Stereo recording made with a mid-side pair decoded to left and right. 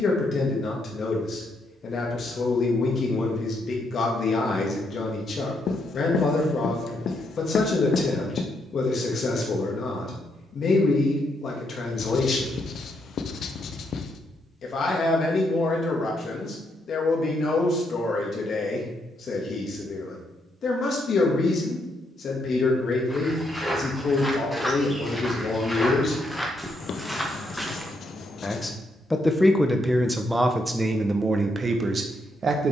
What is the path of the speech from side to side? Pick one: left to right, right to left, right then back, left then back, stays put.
left to right.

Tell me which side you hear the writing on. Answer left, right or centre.
left.